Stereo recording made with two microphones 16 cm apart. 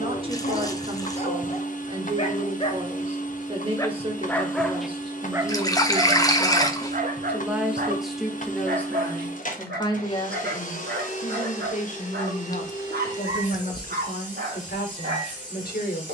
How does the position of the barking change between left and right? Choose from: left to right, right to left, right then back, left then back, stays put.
left to right.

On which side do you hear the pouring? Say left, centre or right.
left.